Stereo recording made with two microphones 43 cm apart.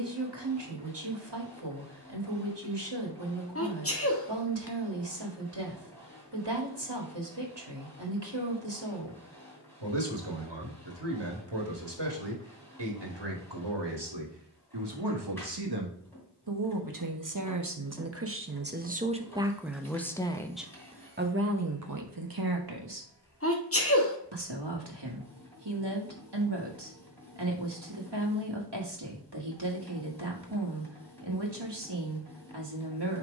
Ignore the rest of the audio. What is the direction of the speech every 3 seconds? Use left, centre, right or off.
right, right, right, right, right, right, centre, right, right, right, right.